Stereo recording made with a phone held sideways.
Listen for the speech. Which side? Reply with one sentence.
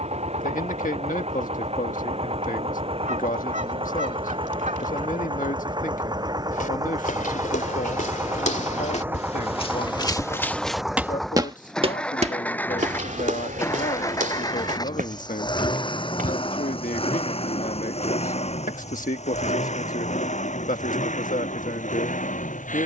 In this clip you hear the speech on the left.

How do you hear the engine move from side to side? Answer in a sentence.
In this clip you hear the engine move to the left.